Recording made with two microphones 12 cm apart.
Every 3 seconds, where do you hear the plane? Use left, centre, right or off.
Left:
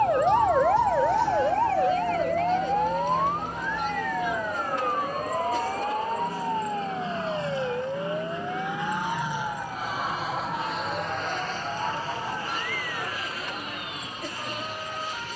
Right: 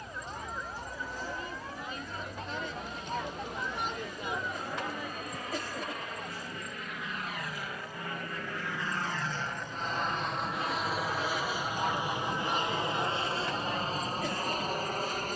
left, left, left, centre, right.